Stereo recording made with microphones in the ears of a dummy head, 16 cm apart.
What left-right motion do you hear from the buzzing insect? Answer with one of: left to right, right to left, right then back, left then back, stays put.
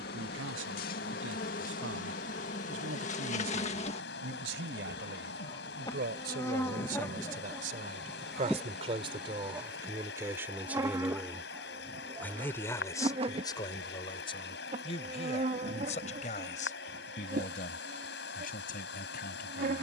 left to right.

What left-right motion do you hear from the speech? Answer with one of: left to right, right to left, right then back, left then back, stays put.
right to left.